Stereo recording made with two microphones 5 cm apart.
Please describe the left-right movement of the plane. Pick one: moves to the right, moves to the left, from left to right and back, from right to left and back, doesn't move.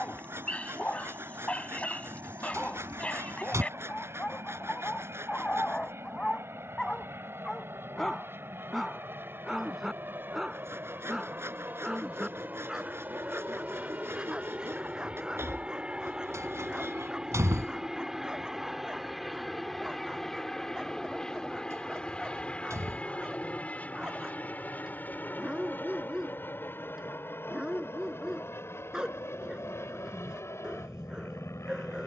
moves to the left.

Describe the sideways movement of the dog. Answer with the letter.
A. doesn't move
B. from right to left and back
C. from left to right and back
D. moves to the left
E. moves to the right
E.